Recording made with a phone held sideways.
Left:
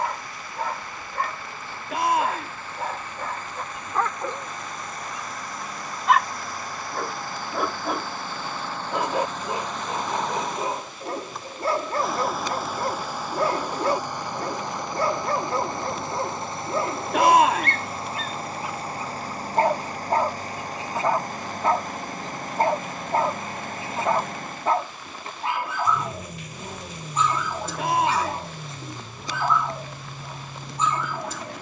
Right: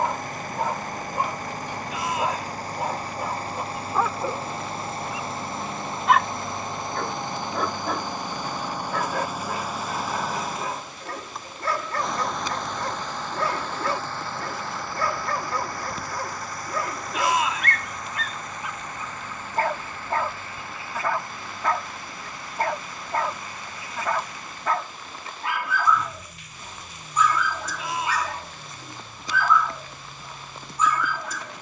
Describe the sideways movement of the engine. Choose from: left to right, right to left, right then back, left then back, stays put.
right to left.